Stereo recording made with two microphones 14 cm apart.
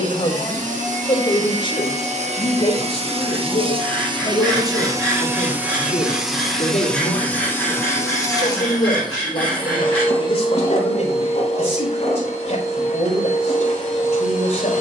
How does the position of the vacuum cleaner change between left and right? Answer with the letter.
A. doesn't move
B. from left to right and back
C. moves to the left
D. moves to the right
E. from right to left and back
C.